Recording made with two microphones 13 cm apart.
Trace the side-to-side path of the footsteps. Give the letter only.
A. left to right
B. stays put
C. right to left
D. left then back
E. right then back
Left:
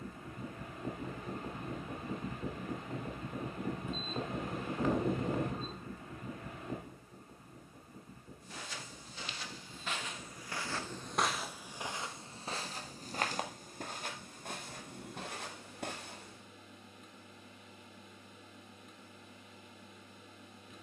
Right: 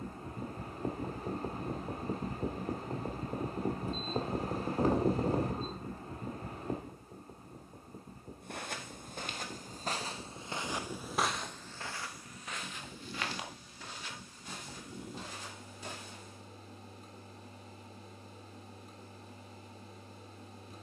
C.